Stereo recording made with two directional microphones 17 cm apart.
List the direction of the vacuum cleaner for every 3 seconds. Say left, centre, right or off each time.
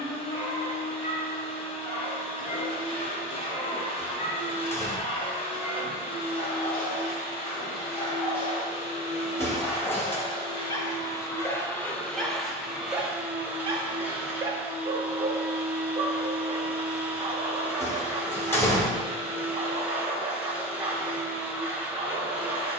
left, left, left, left, centre, centre, centre, centre.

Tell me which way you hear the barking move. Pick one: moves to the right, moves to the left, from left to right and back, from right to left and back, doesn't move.
moves to the right.